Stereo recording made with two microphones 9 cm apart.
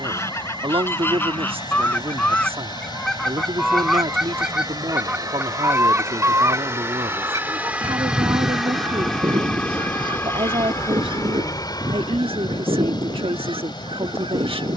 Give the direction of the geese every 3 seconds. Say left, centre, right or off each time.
left, centre, right, right, right.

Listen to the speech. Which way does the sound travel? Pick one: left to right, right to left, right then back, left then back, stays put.
stays put.